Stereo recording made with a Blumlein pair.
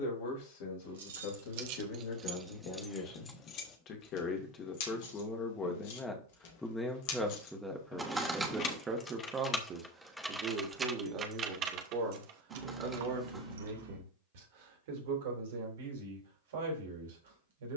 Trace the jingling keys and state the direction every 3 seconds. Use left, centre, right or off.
right, left, left, centre, right, off.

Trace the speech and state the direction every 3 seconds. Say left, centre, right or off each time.
left, left, centre, right, right, right.